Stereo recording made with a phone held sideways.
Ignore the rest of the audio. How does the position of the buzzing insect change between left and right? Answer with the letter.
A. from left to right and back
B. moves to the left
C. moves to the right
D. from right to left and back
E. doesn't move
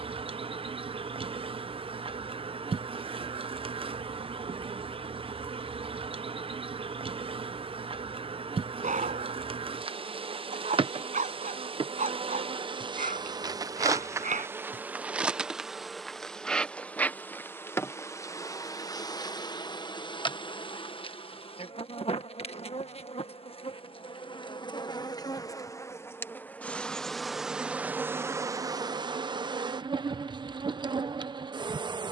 D.